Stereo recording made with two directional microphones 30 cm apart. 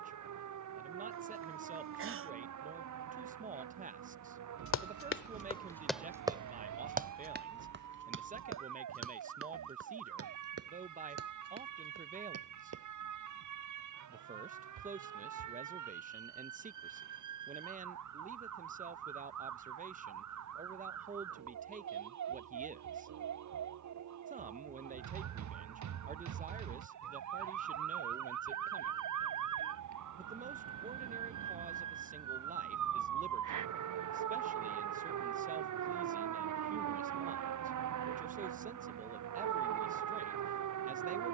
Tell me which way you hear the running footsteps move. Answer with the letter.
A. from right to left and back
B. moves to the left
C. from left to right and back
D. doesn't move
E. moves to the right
E.